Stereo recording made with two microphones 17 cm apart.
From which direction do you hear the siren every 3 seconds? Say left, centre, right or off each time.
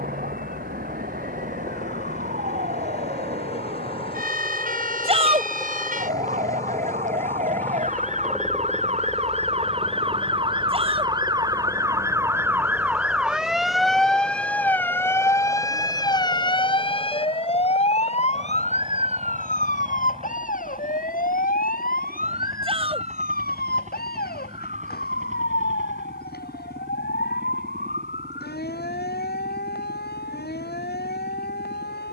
right, right, right, right, centre, left, left, left, left, left, left.